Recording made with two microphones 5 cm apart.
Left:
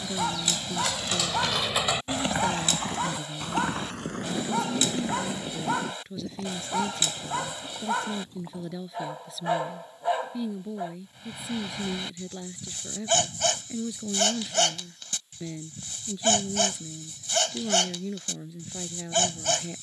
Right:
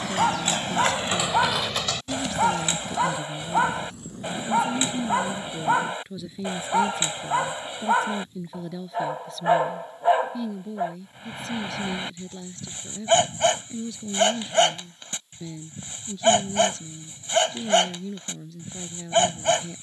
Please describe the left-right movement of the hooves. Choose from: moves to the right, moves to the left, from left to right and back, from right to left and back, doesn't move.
moves to the left.